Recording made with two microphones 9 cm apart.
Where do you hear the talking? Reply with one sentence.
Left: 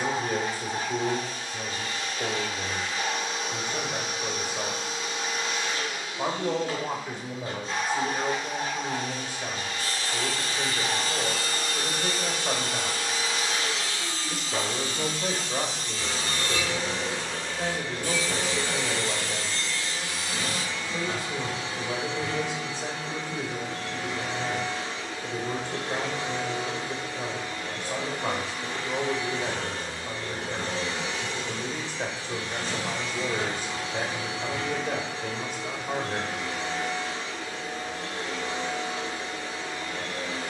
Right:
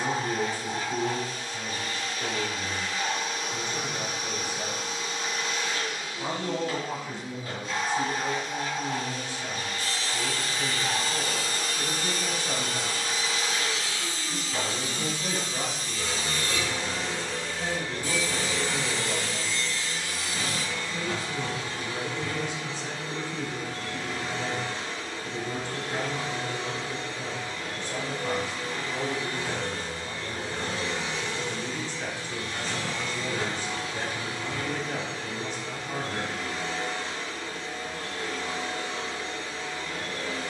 In this clip you hear the talking on the left.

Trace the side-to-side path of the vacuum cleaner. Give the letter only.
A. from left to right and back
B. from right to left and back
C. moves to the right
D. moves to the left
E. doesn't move
E.